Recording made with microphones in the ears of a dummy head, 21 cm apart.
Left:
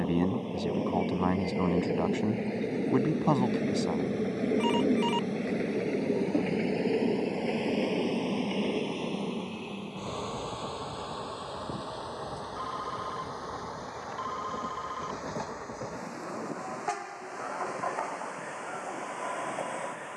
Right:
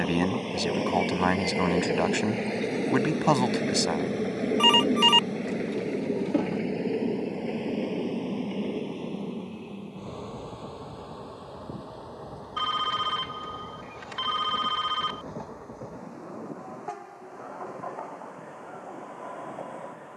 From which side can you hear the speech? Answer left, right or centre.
right.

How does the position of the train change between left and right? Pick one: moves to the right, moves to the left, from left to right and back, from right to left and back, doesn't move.
moves to the left.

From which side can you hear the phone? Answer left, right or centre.
right.